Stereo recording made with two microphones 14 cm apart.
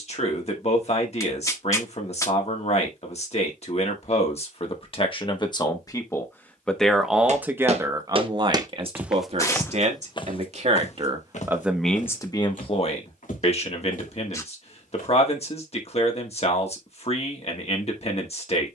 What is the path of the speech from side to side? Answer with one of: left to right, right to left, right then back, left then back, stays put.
right then back.